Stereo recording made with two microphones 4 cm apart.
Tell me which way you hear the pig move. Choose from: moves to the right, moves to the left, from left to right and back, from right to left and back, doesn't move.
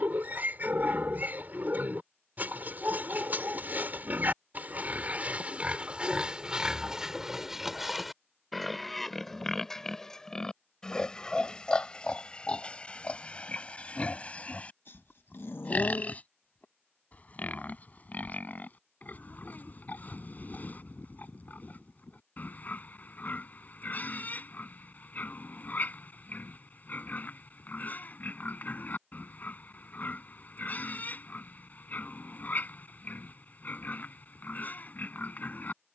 moves to the left.